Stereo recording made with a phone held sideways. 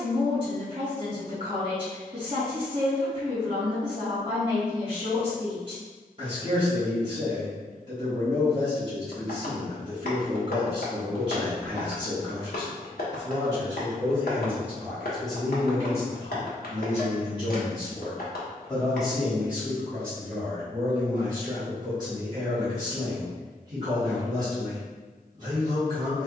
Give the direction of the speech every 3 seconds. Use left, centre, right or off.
right, right, right, right, right, left, centre, right, right.